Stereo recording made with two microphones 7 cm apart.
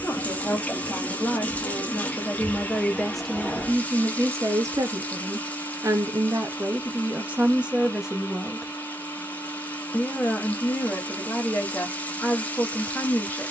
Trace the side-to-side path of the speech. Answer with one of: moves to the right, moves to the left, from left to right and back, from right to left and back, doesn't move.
from left to right and back.